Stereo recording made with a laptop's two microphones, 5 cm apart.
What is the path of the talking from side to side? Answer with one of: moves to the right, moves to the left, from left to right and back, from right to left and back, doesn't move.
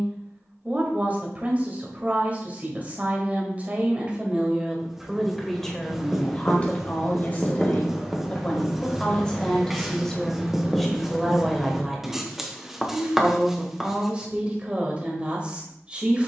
from right to left and back.